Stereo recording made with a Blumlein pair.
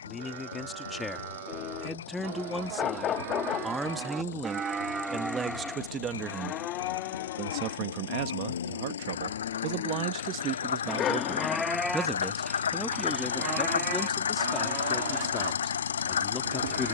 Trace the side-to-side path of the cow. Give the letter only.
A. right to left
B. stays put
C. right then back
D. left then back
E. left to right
D.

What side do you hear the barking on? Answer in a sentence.
You can hear the barking on the left.